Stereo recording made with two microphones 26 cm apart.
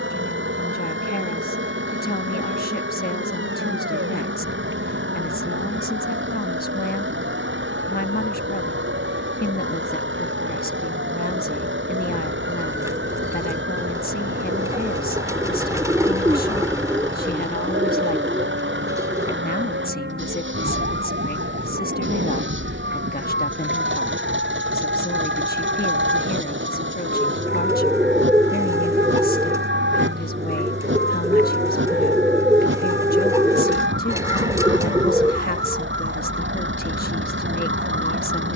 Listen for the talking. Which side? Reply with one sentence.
In this clip you hear the talking on the left.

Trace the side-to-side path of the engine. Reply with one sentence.
You can hear the engine stay in one place.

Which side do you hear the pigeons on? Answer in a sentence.
You can hear the pigeons in the centre.